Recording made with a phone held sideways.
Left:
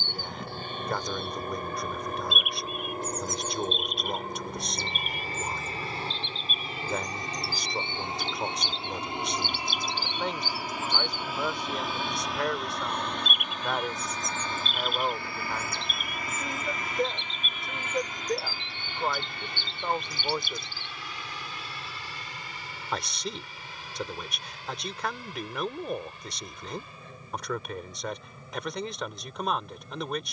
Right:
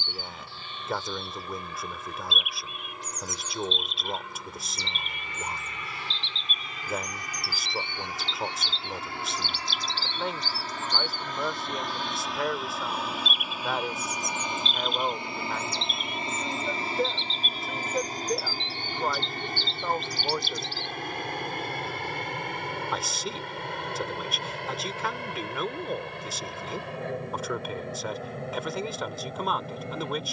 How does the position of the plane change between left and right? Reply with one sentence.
You can hear the plane move from left to right.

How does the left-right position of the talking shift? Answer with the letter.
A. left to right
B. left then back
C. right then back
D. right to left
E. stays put
E.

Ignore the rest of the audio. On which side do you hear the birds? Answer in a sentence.
You can hear the birds on the left.